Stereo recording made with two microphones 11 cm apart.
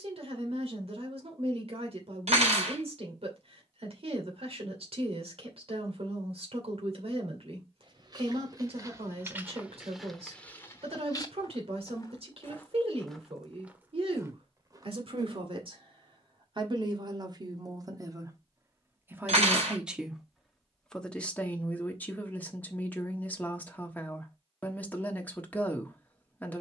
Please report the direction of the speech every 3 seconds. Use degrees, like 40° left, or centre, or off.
60° right, 60° right, 60° right, 60° right, 60° right, 50° right, 10° right, 10° left, 20° left.